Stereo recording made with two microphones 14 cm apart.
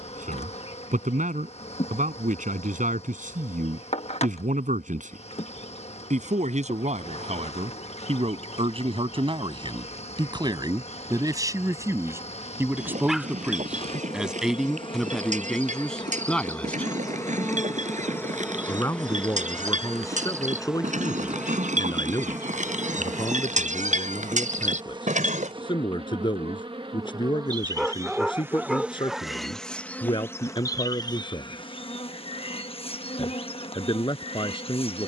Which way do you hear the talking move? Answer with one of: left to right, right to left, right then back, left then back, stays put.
right to left.